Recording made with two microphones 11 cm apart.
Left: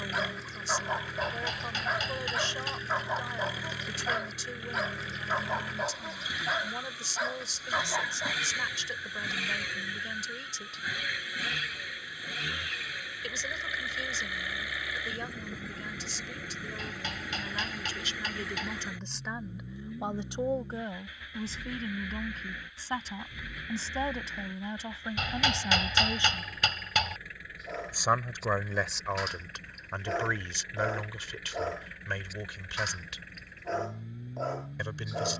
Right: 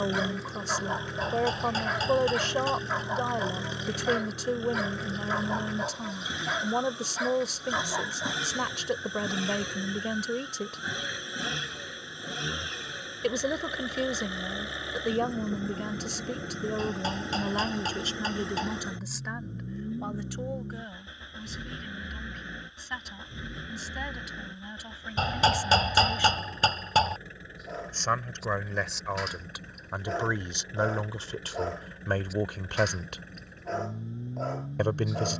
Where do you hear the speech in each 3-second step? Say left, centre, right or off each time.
right, right, right, right, right, right, centre, left, left, centre, right, right.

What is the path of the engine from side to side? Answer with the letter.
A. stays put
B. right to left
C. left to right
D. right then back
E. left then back
A.